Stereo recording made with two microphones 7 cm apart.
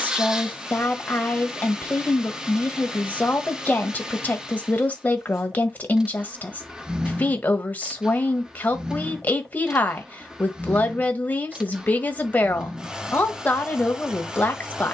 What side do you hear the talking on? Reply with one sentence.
In this clip you hear the talking on the left.